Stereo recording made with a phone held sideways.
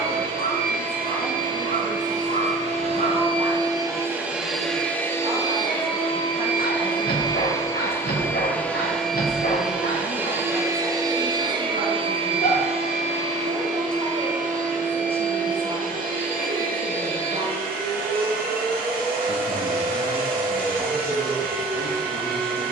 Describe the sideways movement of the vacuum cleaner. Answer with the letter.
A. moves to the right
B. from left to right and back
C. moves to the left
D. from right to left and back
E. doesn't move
D.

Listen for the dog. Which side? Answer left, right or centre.
left.